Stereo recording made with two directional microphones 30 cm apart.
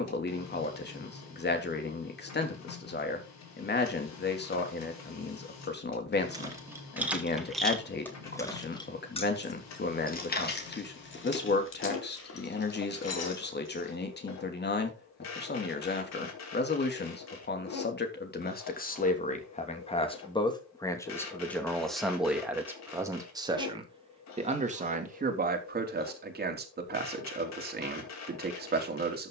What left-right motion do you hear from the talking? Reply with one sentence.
In this clip you hear the talking move to the right.